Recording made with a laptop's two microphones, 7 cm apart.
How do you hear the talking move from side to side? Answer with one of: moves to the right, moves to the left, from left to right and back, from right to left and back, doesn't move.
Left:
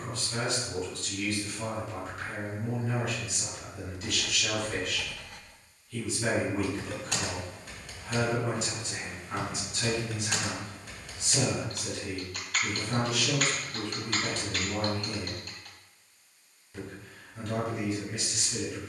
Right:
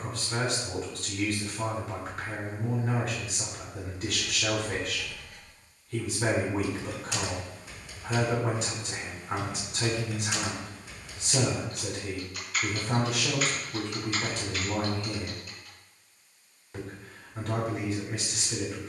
doesn't move.